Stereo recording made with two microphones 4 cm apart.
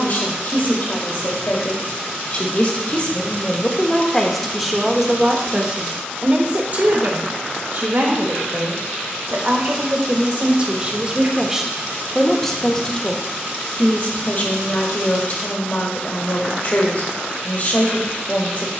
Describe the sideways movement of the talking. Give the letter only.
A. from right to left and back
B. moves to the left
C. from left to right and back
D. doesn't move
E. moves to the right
C.